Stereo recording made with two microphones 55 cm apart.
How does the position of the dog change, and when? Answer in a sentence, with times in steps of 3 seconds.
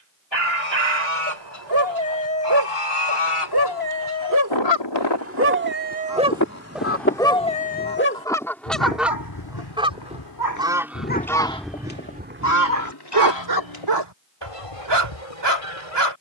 You can hear the dog on the right from 0 s, in the centre from 6 s, on the left from 9 s and on the right from 12 s.